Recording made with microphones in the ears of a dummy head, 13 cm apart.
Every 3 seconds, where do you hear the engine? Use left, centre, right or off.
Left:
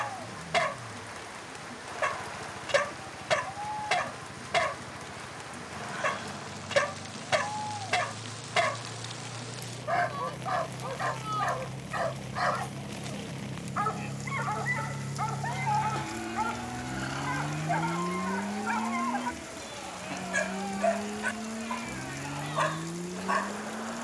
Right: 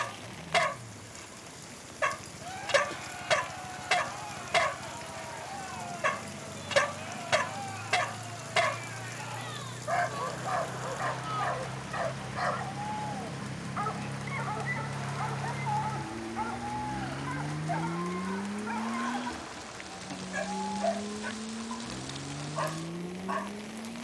right, right, right, right, right, centre, left, left.